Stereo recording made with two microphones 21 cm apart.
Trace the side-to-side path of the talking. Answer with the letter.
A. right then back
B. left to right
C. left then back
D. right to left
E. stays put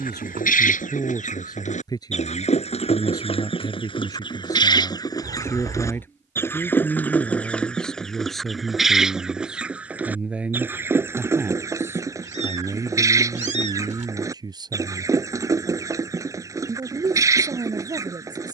B.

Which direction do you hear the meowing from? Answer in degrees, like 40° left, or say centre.
30° right.